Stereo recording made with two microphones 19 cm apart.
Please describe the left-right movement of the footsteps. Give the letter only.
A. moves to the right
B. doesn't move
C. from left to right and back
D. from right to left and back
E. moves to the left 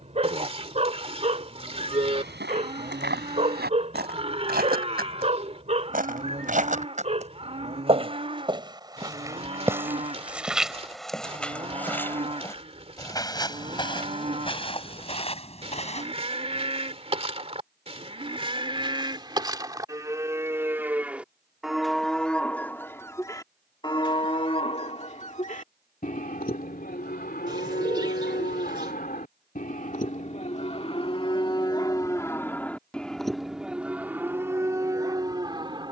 E.